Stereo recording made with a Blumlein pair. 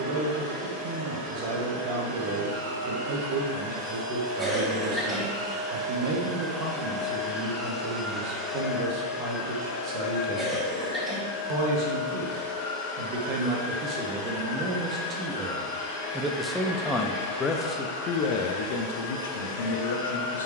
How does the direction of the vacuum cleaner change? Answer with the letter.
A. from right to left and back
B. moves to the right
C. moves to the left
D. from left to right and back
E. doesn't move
C.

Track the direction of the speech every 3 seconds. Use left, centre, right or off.
right, right, right, right, right, centre, left.